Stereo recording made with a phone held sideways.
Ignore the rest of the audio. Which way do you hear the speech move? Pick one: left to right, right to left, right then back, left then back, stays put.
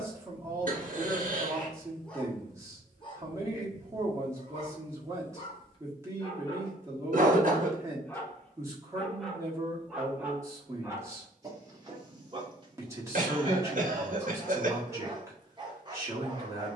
stays put.